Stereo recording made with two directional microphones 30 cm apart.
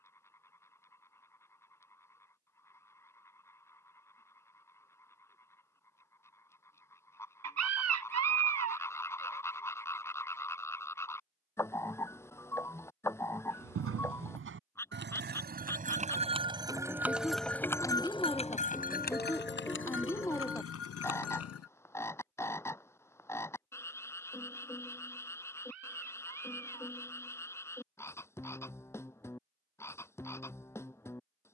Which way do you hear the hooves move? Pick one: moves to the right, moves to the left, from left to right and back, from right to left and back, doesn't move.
moves to the left.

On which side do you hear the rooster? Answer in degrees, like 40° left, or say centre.
60° right.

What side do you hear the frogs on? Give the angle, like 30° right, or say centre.
10° left.